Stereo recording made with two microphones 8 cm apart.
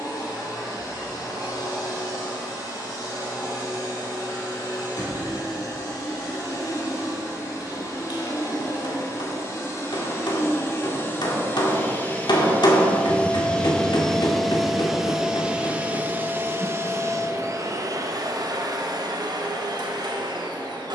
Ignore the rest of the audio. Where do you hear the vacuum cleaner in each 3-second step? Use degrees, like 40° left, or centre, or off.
50° left, 50° left, 40° left, 30° left, 10° left, 30° right, 60° right.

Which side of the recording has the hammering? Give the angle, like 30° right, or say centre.
70° left.